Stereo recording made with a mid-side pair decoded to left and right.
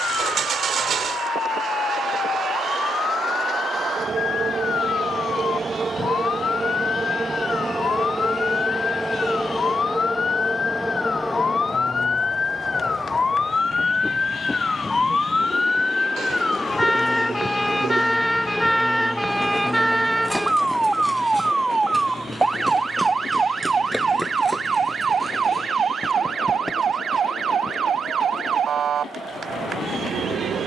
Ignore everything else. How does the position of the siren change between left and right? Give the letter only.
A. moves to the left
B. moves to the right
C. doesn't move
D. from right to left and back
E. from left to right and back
B.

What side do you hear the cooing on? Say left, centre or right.
right.